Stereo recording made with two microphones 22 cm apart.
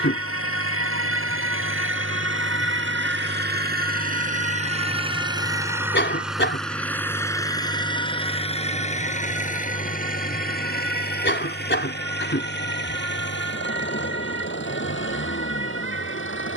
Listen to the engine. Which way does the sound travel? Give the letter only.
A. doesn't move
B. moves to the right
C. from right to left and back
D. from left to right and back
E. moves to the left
E.